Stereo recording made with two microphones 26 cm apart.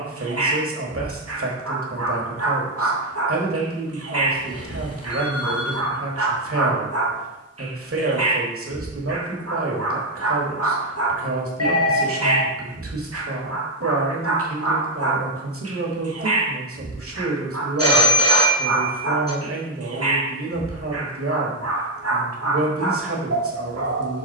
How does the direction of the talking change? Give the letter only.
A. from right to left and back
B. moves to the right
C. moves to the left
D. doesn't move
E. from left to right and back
D.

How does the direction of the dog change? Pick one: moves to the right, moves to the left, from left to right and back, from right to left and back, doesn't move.
doesn't move.